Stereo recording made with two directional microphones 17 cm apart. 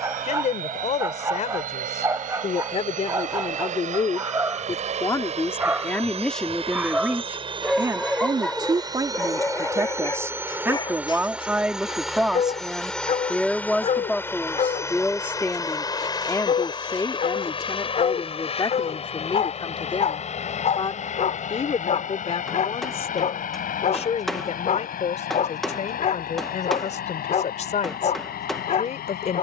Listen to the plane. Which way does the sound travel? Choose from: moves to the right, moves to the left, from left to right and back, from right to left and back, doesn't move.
moves to the left.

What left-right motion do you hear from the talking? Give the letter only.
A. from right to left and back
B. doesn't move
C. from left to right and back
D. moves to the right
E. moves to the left
C.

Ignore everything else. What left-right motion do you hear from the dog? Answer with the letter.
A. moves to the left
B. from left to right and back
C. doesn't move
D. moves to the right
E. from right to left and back
A.